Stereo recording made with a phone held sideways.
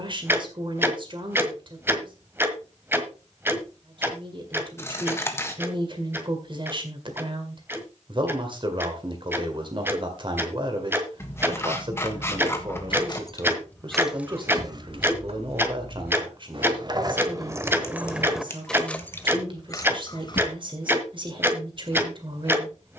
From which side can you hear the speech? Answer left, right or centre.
right.